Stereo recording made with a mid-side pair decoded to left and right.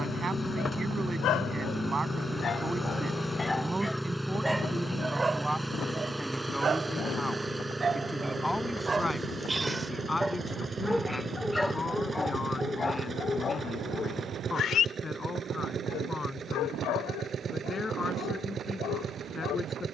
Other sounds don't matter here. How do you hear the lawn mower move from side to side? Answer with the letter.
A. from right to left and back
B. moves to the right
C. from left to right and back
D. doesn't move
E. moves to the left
B.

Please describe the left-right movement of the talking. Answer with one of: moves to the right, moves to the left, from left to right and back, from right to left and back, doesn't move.
moves to the left.